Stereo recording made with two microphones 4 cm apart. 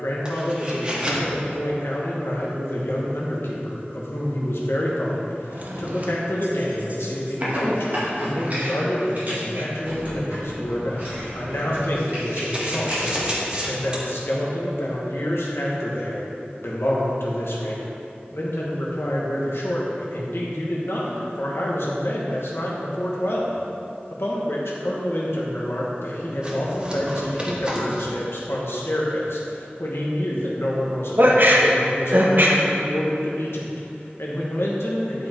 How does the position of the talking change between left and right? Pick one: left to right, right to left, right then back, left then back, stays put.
stays put.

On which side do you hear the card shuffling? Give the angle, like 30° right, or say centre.
20° right.